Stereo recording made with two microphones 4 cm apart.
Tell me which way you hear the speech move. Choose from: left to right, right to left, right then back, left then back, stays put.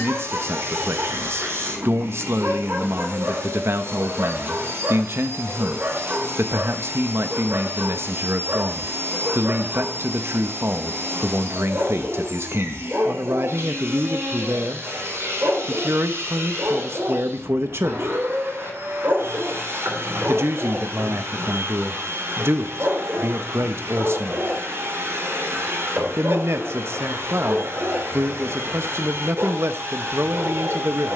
stays put.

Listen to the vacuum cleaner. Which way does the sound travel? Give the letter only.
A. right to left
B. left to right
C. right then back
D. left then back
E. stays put
E.